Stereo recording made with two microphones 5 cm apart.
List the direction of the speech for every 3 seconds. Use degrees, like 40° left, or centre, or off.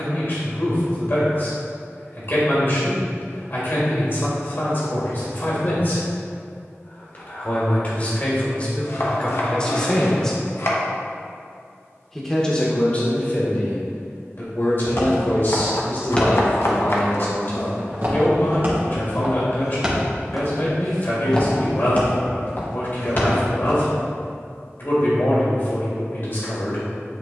50° left, 50° left, 40° left, 20° left, 40° left, 50° left, 50° left, 50° left, 50° left.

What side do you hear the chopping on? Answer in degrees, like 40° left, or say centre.
60° left.